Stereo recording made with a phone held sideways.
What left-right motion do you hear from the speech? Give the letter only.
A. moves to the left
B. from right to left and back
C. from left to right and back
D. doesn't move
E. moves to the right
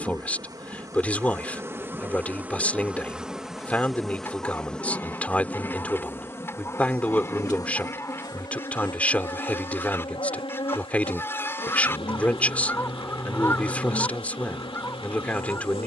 D.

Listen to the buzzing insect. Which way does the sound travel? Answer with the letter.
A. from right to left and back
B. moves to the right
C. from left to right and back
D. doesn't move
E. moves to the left
E.